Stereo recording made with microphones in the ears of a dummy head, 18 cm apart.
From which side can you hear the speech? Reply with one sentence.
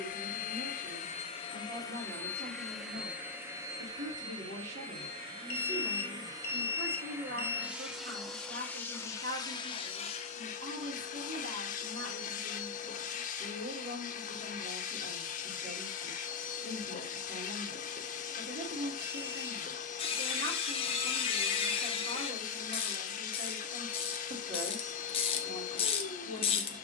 In this clip you hear the speech on the right.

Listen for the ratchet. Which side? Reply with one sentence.
You can hear the ratchet on the left.